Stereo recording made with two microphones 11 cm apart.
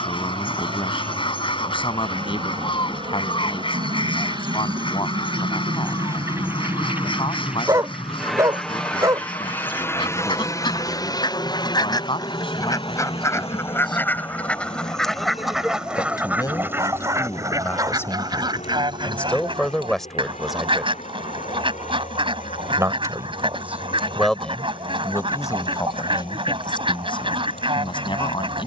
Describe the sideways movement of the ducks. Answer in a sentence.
You can hear the ducks travel towards the right.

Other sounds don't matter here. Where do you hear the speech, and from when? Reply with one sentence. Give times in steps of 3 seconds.
You can hear the speech on the left from 0 s, in the centre from 18 s, on the right from 21 s and on the left from 24 s.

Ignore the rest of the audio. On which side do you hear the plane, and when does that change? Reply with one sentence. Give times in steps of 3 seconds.
In this clip you hear the plane on the right from 0 s, in the centre from 6 s and on the left from 9 s.